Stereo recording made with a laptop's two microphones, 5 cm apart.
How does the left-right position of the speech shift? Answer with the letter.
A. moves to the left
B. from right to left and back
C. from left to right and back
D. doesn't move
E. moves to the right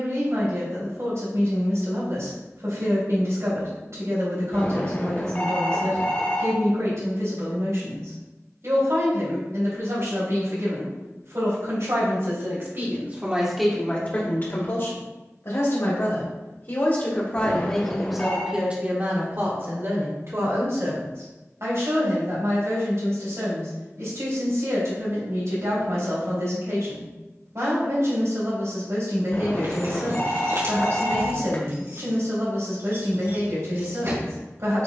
B.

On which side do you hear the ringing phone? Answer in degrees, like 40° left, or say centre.
30° left.